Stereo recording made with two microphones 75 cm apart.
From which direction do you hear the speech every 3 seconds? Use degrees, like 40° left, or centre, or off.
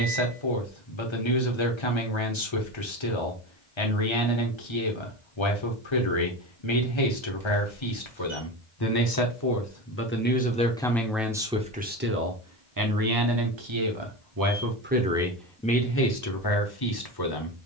40° left, 40° left, 40° left, 10° left, 30° right, 20° left.